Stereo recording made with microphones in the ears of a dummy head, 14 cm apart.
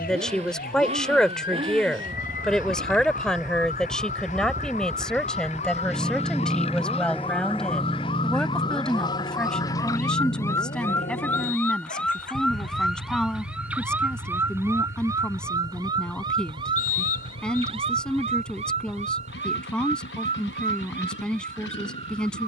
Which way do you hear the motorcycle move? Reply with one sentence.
In this clip you hear the motorcycle move to the left.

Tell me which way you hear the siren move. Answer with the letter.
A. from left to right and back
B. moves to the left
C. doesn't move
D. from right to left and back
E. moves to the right
E.